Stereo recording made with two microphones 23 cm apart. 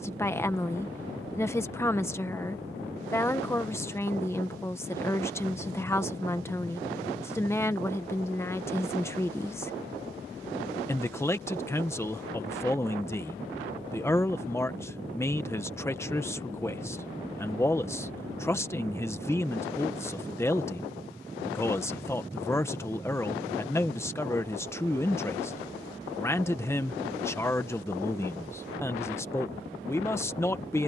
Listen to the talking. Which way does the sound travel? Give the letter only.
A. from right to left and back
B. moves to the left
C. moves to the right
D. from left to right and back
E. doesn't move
E.